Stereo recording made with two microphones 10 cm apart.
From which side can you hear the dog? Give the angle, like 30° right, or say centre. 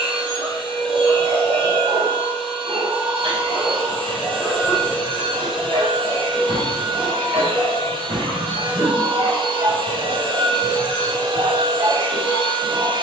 70° right.